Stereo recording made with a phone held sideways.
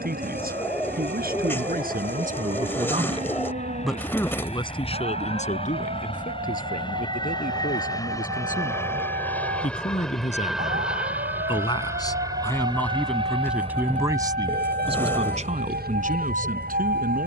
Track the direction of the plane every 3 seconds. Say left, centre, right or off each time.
left, left, left, centre, right, right.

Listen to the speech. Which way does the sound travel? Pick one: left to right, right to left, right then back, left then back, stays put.
left then back.